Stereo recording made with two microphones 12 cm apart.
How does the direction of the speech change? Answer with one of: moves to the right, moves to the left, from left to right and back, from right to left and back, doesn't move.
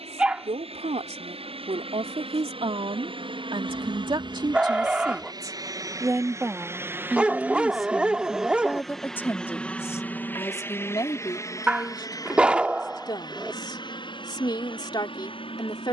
moves to the left.